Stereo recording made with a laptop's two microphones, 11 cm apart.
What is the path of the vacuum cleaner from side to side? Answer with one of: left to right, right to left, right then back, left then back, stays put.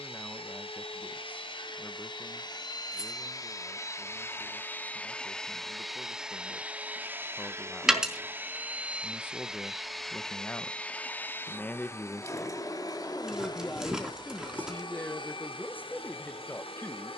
right then back.